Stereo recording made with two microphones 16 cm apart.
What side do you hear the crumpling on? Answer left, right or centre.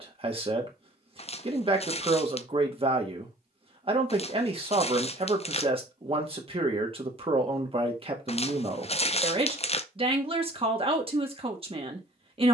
left.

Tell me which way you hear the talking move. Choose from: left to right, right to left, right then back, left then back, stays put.
stays put.